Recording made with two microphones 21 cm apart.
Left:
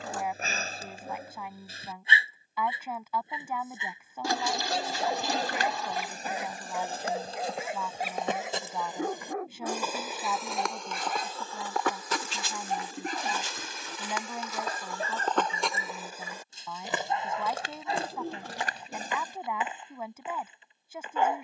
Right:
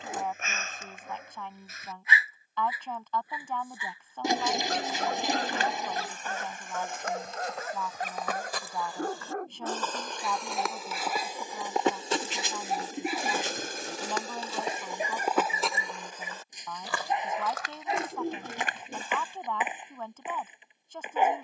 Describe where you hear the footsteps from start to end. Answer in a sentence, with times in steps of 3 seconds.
In this clip you hear the footsteps not at all from 0 s, on the left from 3 s, in the centre from 9 s, on the right from 12 s, in the centre from 15 s and on the left from 18 s.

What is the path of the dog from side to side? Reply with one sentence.
In this clip you hear the dog go from the left side to the right.